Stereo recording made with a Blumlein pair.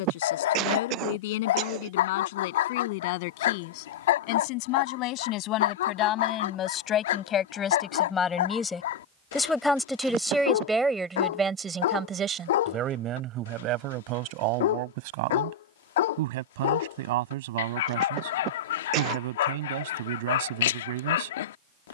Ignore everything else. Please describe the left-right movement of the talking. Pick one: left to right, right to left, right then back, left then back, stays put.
left to right.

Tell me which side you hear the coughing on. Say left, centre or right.
right.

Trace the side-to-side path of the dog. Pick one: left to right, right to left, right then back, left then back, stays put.
stays put.